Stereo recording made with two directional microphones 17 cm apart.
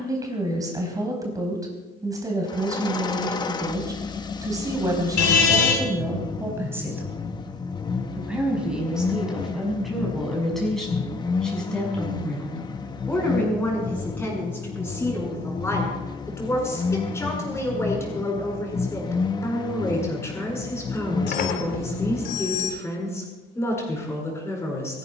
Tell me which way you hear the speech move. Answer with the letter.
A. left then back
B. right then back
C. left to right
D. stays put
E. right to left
E.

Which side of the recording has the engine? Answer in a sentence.
You can hear the engine on the left.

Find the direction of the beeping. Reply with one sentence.
In this clip you hear the beeping on the left.